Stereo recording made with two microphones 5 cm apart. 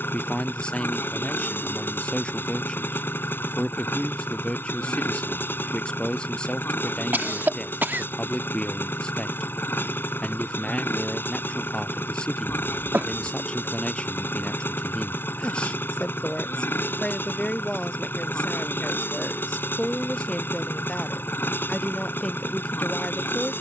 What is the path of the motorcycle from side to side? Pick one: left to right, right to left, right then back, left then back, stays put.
stays put.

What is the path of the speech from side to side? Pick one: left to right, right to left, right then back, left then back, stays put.
stays put.